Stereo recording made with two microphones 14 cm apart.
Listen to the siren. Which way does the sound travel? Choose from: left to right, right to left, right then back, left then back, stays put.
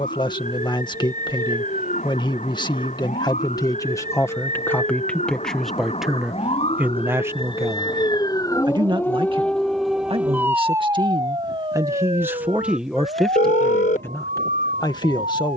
left to right.